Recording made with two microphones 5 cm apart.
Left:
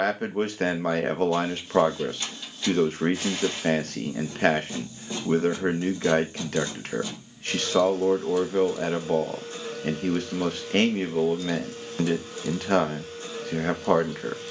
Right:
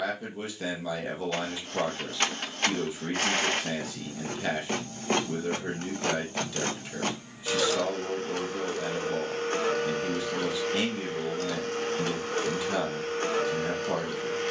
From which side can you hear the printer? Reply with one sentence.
In this clip you hear the printer on the right.